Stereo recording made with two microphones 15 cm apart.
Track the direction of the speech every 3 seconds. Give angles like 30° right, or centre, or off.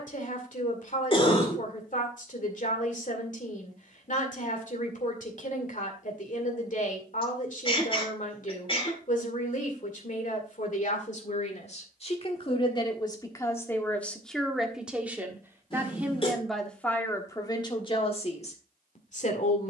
60° left, 60° left, 60° left, 50° left, 20° left, 10° left, 50° left.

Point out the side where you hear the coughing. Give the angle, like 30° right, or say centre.
40° left.